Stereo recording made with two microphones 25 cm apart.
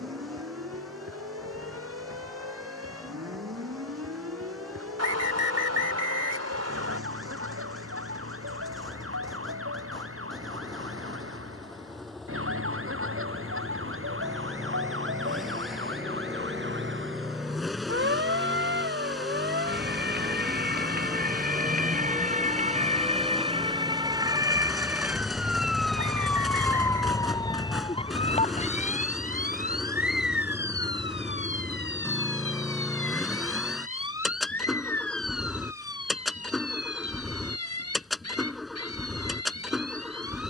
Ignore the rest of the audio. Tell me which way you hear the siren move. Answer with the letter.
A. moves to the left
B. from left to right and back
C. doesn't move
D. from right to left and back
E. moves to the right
A.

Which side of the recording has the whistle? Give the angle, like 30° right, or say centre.
80° right.